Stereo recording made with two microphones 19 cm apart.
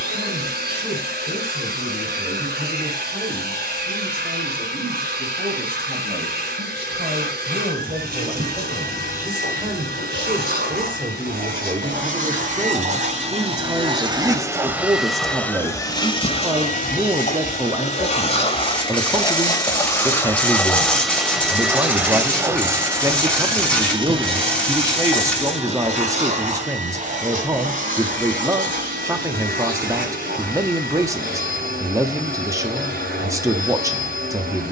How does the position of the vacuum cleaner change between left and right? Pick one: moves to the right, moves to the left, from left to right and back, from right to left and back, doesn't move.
from right to left and back.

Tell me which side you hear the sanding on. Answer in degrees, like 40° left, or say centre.
10° left.